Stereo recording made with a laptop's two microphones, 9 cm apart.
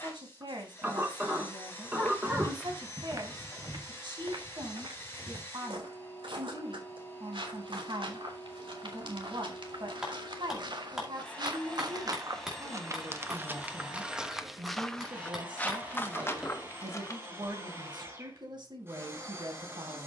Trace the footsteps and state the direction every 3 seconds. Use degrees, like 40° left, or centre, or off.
10° left, 70° right, 80° right, 60° right, 20° right, 30° left, off.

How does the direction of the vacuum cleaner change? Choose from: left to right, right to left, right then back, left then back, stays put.
left to right.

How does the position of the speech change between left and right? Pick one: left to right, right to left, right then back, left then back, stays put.
stays put.